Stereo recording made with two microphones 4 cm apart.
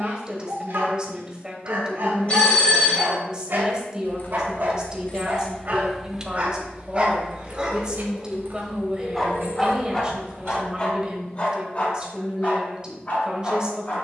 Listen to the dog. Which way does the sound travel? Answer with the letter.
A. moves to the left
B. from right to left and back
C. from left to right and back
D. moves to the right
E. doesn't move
A.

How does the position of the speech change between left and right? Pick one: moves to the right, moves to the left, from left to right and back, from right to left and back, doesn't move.
doesn't move.